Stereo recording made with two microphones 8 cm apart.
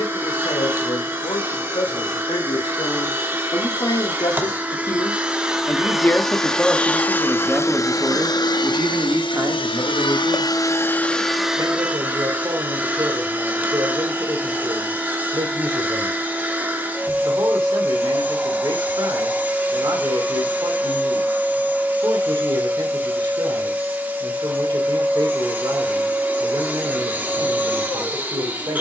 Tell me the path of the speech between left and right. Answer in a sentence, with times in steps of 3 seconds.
You can hear the speech on the left from 0 s, in the centre from 6 s and on the right from 9 s.